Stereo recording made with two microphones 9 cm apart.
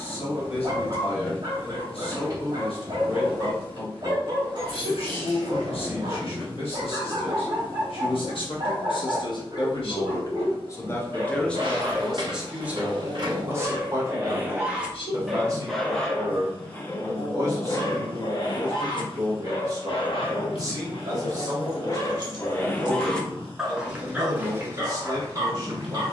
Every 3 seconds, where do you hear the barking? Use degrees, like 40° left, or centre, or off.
40° right, 40° right, 40° right, 40° right, 30° right, 20° left, 60° left, 30° left, 30° right.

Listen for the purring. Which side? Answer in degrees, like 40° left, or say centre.
70° left.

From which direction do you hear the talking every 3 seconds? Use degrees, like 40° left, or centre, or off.
80° left, 80° left, 70° left, 30° left, 20° right, 40° right, 40° right, 40° right, 40° right.